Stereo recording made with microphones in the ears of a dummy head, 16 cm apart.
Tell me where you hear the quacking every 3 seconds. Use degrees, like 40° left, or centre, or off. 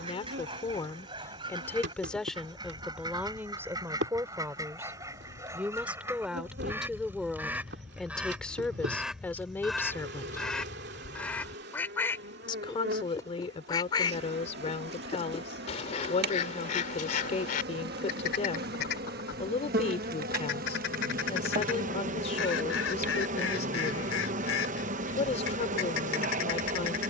20° right, 20° right, 10° right, centre, 20° left, 40° left, 50° left, 70° left, 70° left.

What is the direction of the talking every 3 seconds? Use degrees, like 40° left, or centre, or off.
10° left, 10° right, centre, 10° left, 30° left, 40° left, 40° left, 40° left, 40° left.